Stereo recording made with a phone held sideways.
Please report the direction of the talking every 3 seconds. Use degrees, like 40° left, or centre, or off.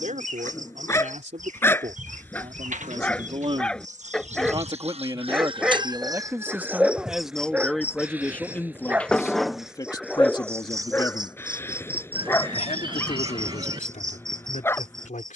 50° right, 30° right, centre, 30° left, 50° left.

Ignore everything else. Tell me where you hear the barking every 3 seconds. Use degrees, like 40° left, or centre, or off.
10° left, centre, 10° right, 10° left, 20° left.